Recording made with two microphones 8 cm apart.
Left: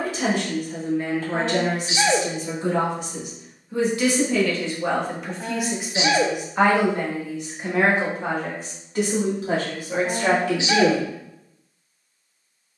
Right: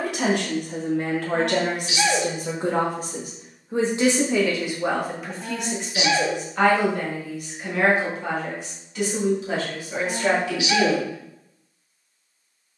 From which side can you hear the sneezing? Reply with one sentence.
In this clip you hear the sneezing on the left.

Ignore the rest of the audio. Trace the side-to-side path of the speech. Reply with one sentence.
In this clip you hear the speech go from the right side to the left.